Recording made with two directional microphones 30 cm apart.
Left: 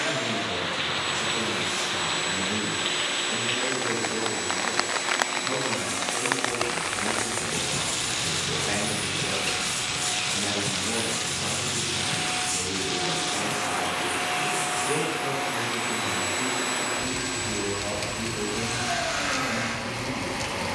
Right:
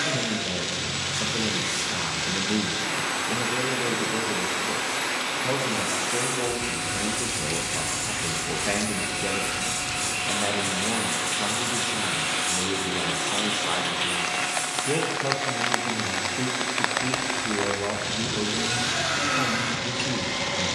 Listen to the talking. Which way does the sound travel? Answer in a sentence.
You can hear the talking stay put.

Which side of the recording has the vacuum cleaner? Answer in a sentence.
In this clip you hear the vacuum cleaner on the right.